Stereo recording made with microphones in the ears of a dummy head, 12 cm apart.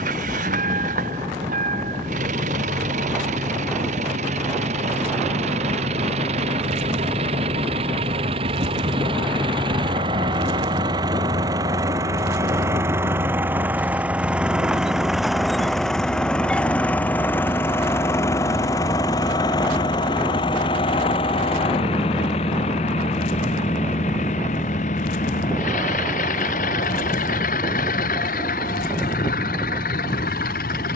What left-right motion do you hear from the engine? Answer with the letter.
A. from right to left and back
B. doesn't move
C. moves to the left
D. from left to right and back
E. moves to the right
C.